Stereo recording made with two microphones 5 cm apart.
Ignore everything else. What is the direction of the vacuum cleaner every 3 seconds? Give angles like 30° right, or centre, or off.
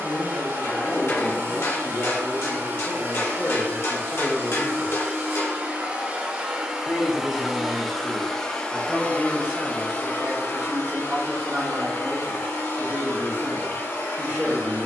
50° right, 40° right, centre, 50° left, 80° left.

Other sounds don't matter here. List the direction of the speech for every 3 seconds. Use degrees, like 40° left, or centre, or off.
70° left, 50° left, centre, 30° right, 40° right.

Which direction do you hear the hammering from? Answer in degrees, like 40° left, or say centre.
60° left.